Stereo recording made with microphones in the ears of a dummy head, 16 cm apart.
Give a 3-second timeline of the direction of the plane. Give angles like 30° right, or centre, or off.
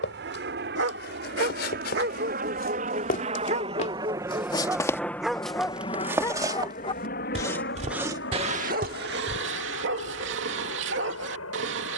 60° right, 10° right, 50° left, 70° left.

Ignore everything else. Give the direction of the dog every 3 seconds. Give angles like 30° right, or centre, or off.
60° right, 20° right, 10° right, 70° right.